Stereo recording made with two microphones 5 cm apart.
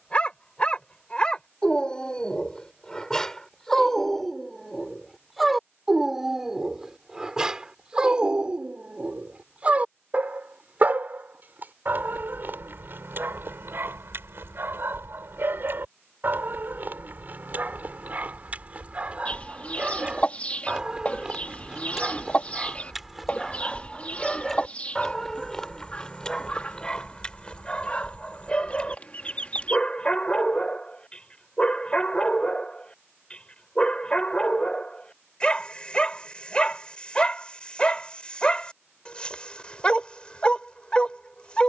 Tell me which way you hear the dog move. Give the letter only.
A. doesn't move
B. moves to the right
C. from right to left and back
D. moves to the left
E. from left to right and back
E.